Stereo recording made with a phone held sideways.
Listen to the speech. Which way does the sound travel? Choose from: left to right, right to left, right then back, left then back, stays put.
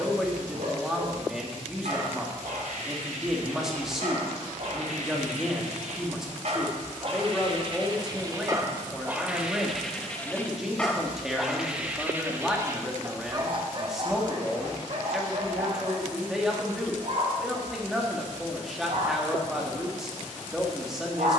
stays put.